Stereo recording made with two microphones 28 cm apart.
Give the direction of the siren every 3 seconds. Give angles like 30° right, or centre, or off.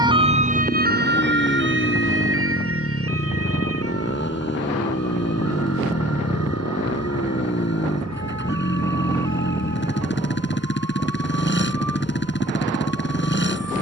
40° right, 60° right, 60° right, 70° right, 70° right.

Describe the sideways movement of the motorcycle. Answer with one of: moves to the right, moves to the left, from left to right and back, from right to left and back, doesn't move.
doesn't move.